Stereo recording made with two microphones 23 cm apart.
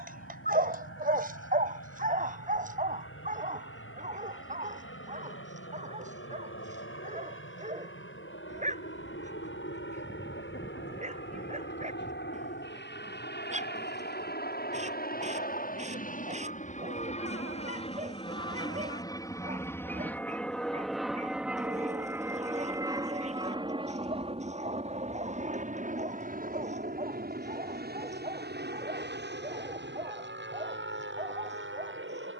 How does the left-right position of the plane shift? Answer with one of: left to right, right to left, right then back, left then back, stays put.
left to right.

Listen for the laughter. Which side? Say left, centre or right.
left.